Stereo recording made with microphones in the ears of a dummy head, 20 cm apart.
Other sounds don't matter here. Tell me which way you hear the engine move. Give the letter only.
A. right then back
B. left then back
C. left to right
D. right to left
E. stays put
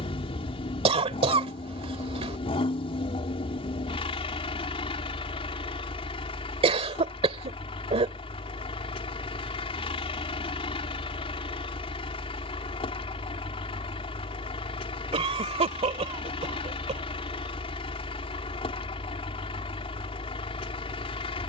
E.